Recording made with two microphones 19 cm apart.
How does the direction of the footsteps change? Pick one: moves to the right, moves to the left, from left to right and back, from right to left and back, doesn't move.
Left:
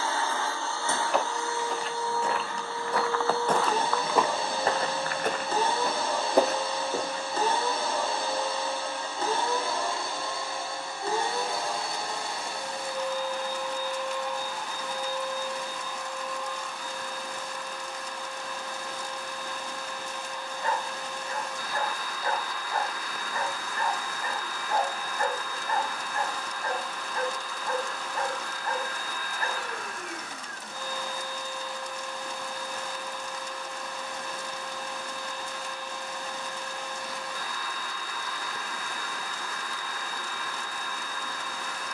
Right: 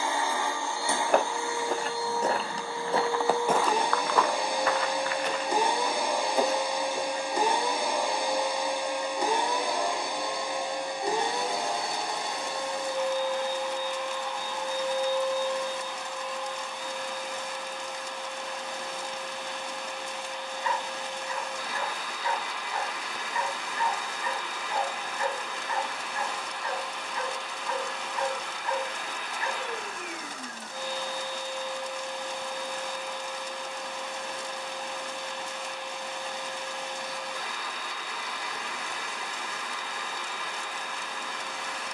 moves to the left.